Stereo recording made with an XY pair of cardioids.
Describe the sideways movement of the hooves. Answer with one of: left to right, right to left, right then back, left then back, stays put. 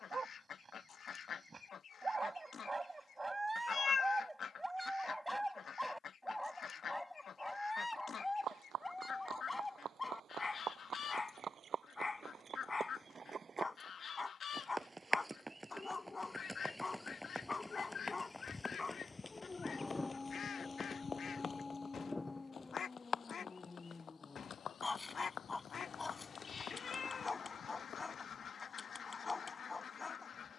right to left.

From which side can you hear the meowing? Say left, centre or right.
left.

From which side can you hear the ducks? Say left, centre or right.
left.